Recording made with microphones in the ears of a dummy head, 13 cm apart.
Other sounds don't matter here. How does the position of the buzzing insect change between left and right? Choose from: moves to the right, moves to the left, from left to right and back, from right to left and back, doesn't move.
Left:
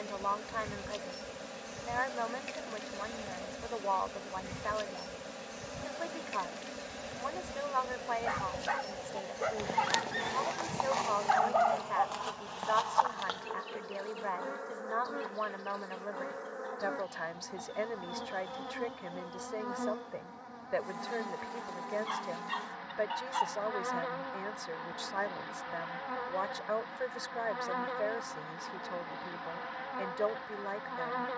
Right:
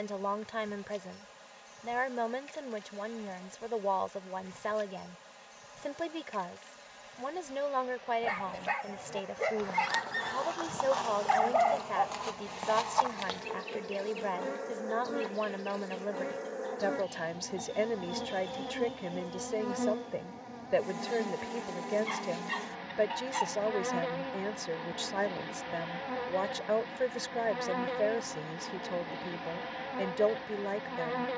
moves to the right.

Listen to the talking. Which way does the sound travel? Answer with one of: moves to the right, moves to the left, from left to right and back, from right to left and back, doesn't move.
doesn't move.